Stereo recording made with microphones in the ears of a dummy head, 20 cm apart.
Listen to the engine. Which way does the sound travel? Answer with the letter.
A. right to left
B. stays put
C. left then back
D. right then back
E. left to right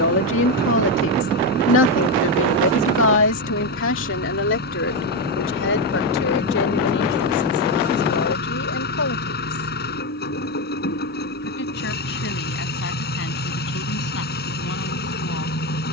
B.